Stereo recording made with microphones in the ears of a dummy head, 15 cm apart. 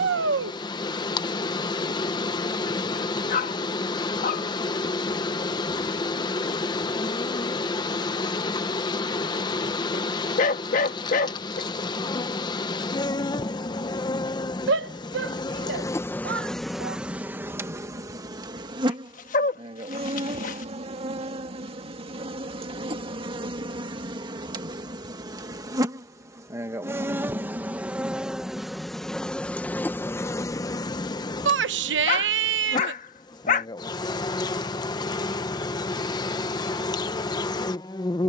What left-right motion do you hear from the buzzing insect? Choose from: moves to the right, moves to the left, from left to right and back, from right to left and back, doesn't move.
from left to right and back.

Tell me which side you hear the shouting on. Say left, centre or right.
right.